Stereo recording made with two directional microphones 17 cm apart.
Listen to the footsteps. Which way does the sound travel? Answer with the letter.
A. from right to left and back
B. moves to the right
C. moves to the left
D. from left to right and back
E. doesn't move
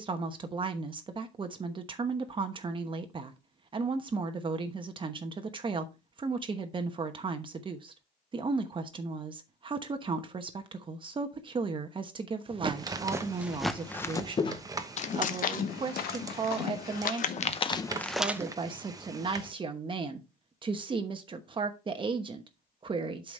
A.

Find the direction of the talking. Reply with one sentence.
You can hear the talking on the right.